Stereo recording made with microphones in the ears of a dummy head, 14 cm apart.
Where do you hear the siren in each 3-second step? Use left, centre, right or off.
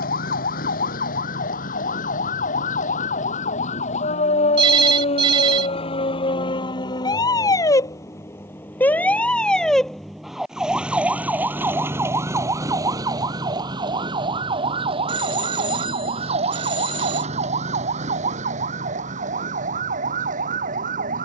left, left, left, centre, right, right, right.